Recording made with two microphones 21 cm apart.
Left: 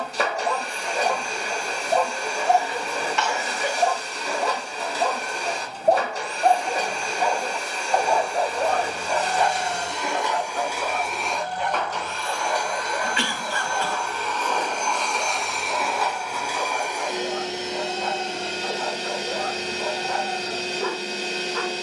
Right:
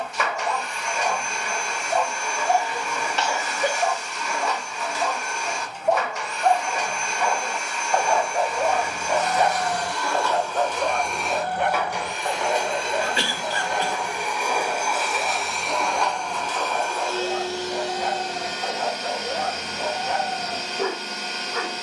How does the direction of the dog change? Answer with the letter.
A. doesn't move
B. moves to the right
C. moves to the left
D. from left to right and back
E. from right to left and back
B.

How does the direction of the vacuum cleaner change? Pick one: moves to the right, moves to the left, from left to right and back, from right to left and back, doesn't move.
from left to right and back.